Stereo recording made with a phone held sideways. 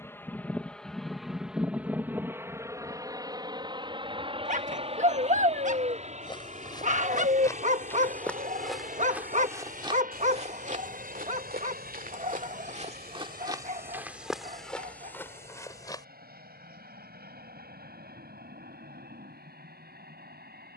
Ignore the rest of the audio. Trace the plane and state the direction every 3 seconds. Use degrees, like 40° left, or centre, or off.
centre, 30° right, 50° right, 50° right, 60° right, 60° right, 60° right.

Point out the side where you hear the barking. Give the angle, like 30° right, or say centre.
50° right.